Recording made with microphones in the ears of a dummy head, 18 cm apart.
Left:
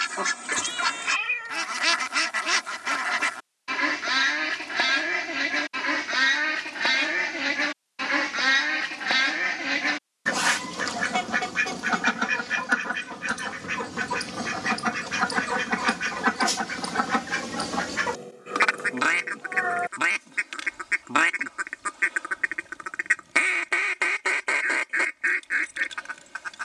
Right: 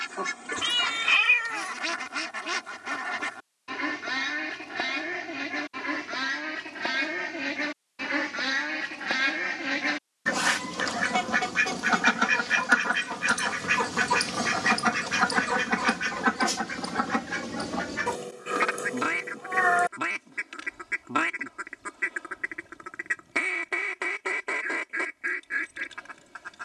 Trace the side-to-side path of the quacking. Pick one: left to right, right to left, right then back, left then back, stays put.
right then back.